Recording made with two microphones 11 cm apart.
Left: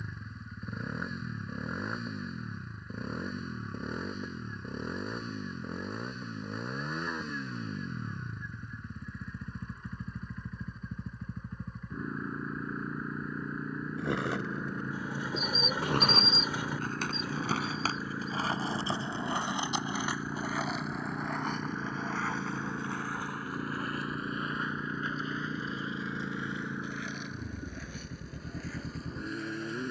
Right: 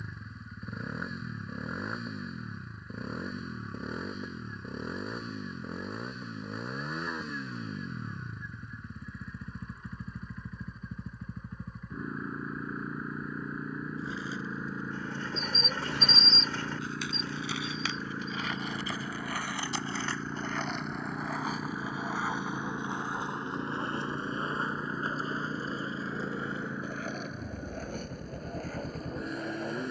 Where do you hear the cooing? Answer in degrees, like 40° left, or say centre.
10° left.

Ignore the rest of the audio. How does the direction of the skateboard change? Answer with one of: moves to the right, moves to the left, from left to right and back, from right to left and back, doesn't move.
moves to the right.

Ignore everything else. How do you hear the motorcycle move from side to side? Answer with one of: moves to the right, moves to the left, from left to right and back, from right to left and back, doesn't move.
doesn't move.